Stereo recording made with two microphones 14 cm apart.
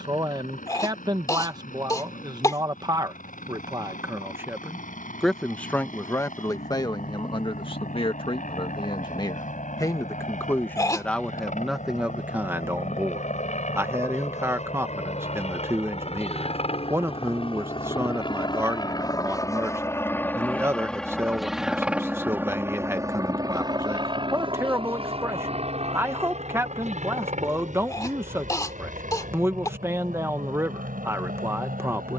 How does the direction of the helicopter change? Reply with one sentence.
You can hear the helicopter move to the right.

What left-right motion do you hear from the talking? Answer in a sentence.
In this clip you hear the talking move from right to left and back again.